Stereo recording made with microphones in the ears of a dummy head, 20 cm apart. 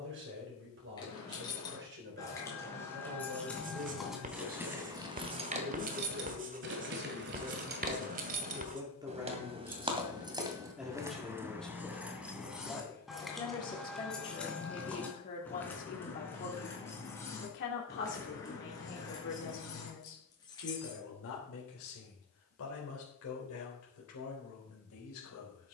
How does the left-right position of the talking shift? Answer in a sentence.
You can hear the talking move to the left.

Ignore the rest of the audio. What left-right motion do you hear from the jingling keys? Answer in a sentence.
In this clip you hear the jingling keys go right and come back.